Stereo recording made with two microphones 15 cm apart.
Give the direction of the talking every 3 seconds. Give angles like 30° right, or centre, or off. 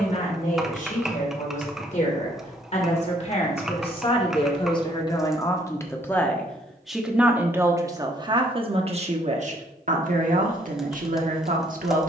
50° left, 30° left, 20° right, 50° right.